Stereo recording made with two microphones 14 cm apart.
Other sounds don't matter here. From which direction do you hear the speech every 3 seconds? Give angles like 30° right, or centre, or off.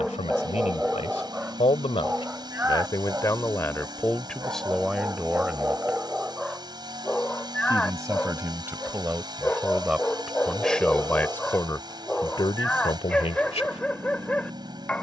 50° left, 10° left, 20° right, centre, 40° left.